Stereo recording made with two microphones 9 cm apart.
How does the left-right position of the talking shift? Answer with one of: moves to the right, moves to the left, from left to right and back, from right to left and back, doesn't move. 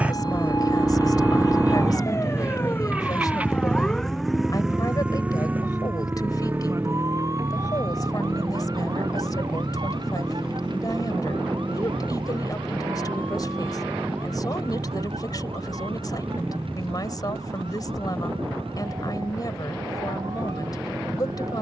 doesn't move.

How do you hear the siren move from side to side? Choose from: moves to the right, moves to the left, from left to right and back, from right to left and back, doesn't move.
moves to the right.